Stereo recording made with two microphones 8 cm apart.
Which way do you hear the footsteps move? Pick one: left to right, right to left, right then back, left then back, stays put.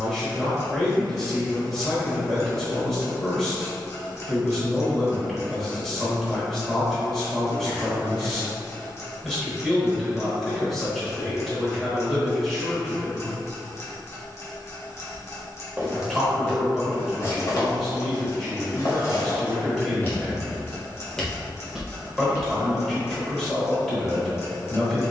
left then back.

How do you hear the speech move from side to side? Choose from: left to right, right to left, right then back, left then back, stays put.
stays put.